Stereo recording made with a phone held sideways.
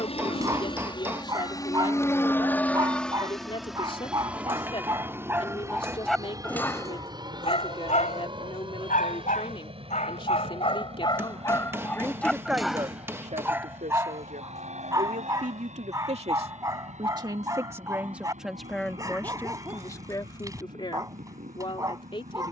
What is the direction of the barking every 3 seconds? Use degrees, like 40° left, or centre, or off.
20° right, 20° right, 40° left, 40° left, 10° right, 20° right, 20° right, 20° right.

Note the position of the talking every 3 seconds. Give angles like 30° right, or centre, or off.
40° left, 40° left, 40° left, 40° left, 40° right, 40° right, 10° left, 40° left.